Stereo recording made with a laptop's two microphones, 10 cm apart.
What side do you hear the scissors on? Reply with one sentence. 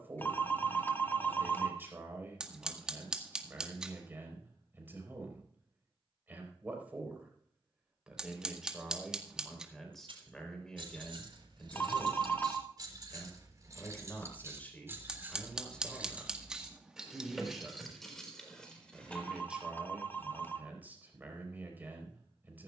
You can hear the scissors in the centre.